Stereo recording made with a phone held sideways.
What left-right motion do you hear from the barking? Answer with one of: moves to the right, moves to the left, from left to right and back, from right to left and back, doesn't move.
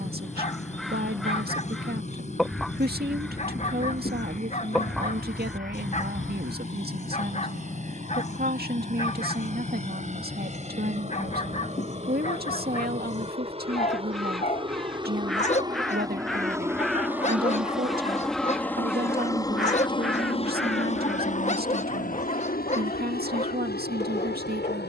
doesn't move.